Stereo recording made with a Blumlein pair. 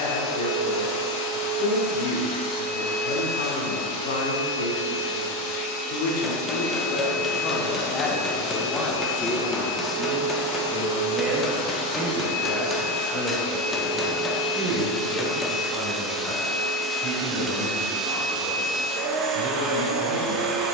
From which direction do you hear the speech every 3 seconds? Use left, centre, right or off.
left, left, left, centre, right, right, right.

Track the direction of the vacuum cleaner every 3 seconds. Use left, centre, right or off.
left, left, left, left, left, centre, right.